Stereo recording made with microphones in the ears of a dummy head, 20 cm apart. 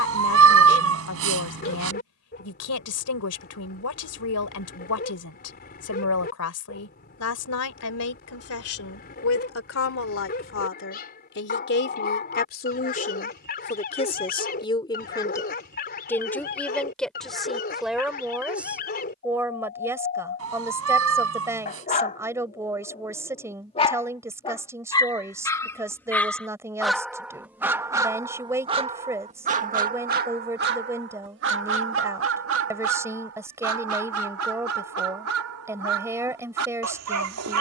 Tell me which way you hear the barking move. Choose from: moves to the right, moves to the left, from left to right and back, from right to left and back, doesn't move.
moves to the right.